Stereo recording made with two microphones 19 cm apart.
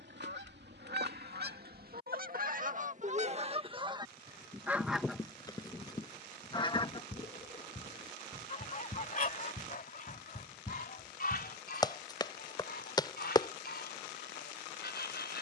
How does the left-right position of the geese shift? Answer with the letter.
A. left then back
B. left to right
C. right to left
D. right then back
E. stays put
C.